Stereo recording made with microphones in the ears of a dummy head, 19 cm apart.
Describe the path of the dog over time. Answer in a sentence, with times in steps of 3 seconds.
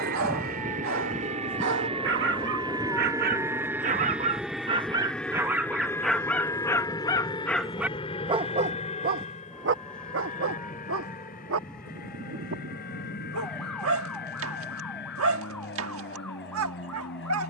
You can hear the dog on the right from 0 s, in the centre from 6 s and on the right from 9 s.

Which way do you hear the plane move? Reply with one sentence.
In this clip you hear the plane go from the right side to the left.